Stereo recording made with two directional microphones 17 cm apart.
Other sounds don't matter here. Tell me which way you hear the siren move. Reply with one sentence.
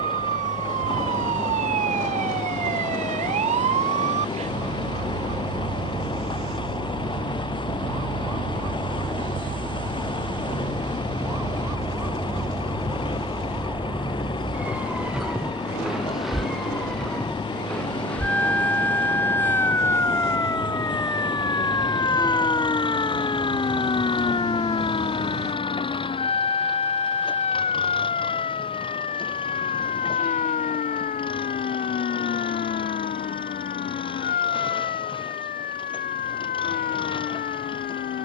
You can hear the siren move to the left.